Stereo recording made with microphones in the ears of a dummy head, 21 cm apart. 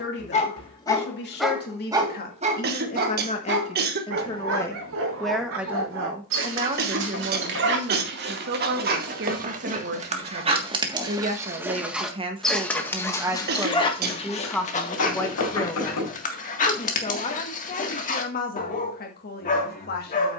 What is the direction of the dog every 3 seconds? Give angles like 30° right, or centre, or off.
centre, 60° right, 50° right, 20° right, 20° left, 30° left, 30° left.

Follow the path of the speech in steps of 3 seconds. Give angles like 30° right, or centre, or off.
40° left, 10° left, 40° right, 40° right, 10° right, 20° left, 40° left.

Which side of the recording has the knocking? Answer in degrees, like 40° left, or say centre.
80° left.